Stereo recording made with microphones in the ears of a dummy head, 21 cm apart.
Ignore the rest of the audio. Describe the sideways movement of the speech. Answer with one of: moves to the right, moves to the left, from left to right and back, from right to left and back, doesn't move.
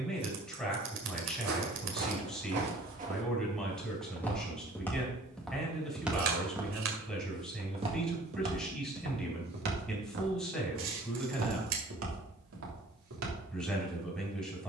doesn't move.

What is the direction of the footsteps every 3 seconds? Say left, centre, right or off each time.
right, centre, right, right, right.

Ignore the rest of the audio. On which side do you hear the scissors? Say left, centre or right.
right.